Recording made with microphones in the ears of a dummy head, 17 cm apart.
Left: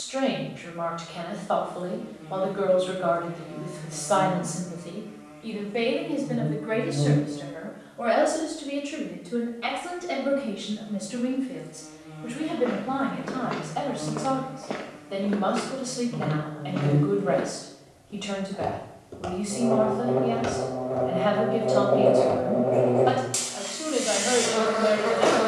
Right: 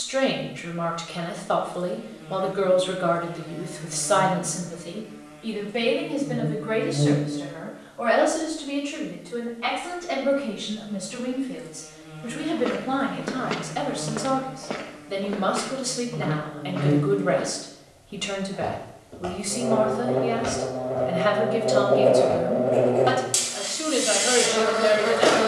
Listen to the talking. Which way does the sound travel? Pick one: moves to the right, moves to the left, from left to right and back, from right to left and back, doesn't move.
from right to left and back.